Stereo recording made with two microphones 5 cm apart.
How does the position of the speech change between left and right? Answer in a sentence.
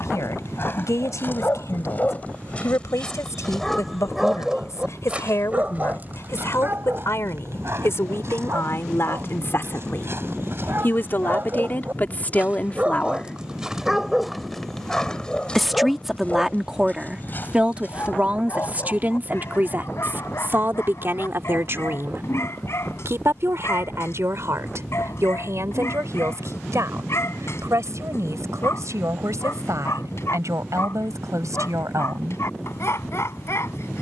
In this clip you hear the speech move to the right.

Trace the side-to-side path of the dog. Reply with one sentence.
In this clip you hear the dog move from left to right and back again.